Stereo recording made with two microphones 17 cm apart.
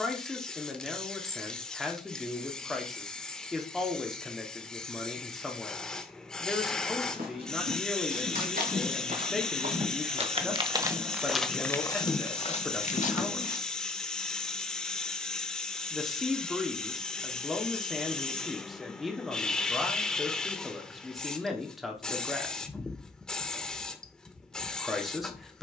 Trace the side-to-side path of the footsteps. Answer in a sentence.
You can hear the footsteps travel towards the left.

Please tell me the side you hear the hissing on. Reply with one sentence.
In this clip you hear the hissing in the centre.